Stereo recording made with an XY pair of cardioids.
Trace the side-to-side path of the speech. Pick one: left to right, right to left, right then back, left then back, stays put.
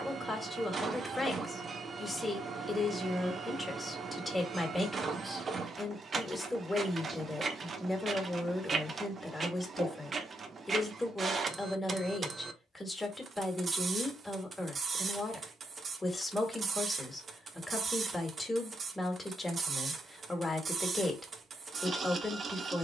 stays put.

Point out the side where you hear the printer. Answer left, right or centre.
right.